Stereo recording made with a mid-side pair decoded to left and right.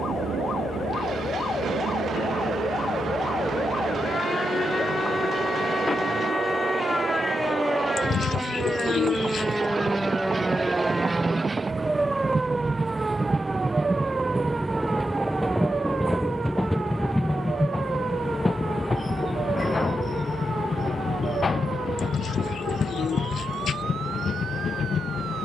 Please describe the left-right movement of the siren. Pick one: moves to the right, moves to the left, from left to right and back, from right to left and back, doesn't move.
moves to the right.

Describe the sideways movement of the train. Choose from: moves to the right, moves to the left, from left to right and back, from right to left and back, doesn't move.
moves to the left.